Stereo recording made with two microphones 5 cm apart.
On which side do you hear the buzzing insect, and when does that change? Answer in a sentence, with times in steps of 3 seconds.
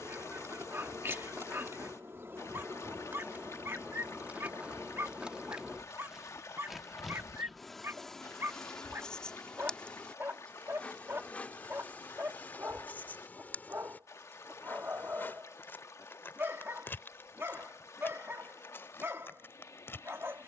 In this clip you hear the buzzing insect on the right from 0 s, in the centre from 6 s and on the left from 9 s.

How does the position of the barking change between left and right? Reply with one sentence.
In this clip you hear the barking stay in one place.